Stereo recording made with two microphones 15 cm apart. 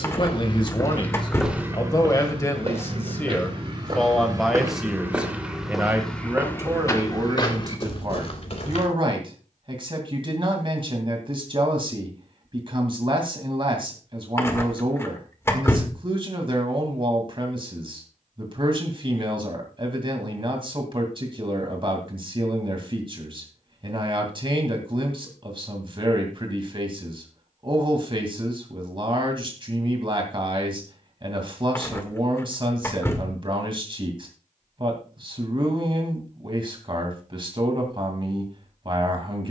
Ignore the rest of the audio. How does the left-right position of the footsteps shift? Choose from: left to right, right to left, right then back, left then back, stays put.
right then back.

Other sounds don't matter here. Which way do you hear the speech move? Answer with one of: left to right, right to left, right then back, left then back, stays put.
left to right.